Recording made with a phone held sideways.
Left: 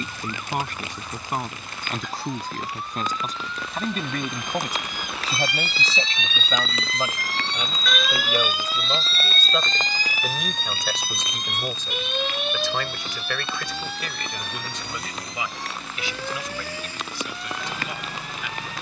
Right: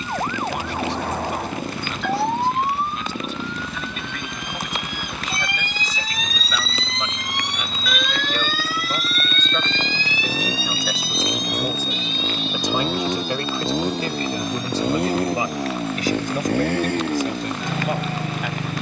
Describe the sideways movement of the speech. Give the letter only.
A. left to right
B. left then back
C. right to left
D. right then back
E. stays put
A.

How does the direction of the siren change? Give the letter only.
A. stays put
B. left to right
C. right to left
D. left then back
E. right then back
C.